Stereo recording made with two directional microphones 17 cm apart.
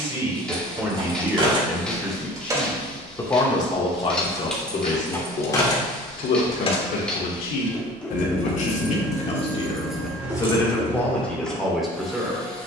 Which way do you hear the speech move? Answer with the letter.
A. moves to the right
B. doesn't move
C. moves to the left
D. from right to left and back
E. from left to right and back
D.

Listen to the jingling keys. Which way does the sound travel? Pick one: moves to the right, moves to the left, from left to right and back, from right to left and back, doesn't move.
from right to left and back.